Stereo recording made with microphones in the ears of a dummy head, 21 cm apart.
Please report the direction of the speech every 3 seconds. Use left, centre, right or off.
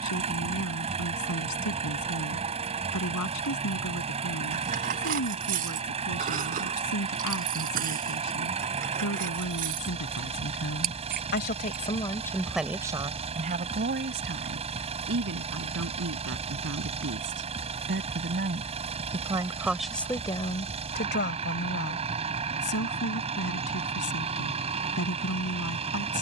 left, left, left, left, right, right, centre, left, left.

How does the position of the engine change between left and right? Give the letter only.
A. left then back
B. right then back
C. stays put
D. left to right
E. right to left
C.